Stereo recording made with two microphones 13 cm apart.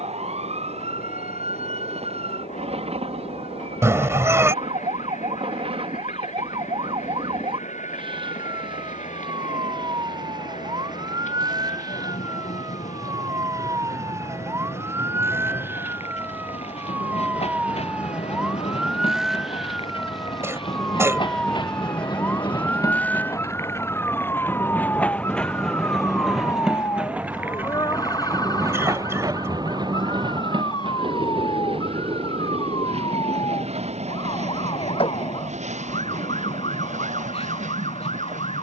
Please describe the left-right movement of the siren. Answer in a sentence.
In this clip you hear the siren go from the right side to the left.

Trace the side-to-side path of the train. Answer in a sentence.
In this clip you hear the train travel towards the right.